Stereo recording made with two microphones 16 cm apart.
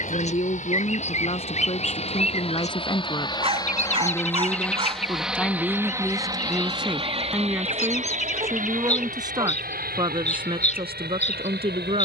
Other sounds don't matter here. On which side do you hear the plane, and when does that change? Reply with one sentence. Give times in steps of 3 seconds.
You can hear the plane on the left from 0 s, in the centre from 3 s and on the right from 6 s.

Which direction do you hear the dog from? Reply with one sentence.
You can hear the dog on the right.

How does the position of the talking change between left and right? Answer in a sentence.
You can hear the talking move from left to right.